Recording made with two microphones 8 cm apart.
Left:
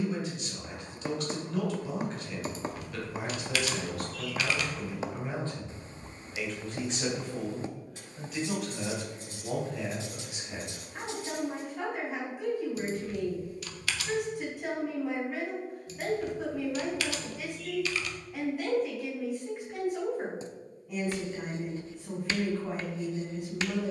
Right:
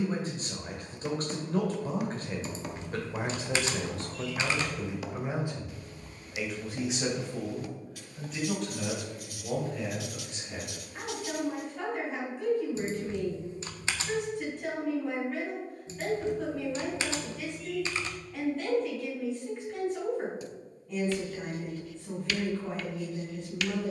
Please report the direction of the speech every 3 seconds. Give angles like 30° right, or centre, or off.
40° right, 30° right, centre, 10° left, 10° left, 10° left, 10° left, 10° left.